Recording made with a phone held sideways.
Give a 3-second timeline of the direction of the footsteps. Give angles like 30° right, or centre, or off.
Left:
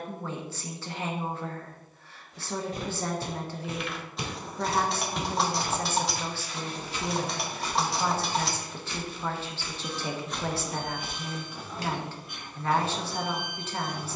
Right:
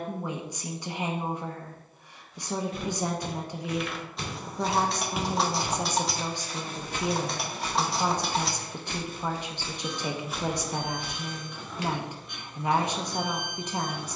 40° left, 10° left, 50° right, 10° right, off.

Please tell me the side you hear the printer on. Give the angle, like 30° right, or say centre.
centre.